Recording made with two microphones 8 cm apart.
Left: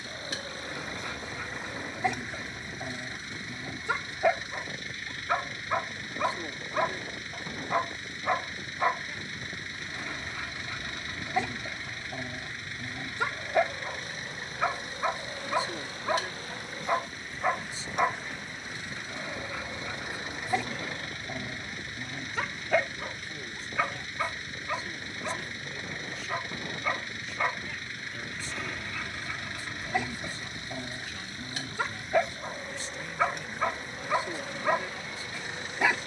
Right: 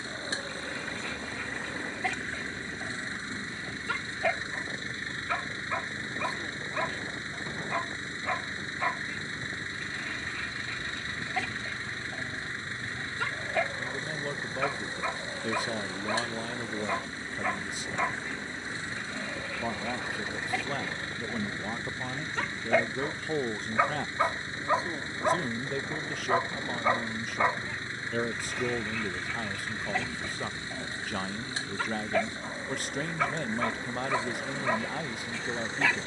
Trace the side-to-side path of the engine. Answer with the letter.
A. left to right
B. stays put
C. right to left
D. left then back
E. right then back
B.